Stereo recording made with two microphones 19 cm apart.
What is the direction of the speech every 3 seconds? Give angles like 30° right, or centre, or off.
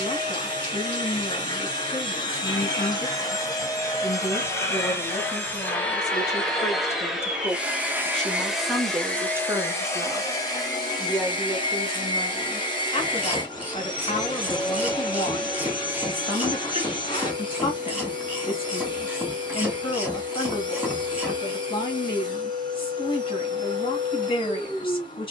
30° left, 20° left, 10° left, centre, 30° left, 30° left, 30° left, 30° left, 30° left.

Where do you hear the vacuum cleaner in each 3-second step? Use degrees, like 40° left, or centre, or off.
20° left, 10° left, centre, 20° left, 20° left, 20° left, 20° left, 20° left, 20° left.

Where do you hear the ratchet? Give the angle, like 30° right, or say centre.
10° right.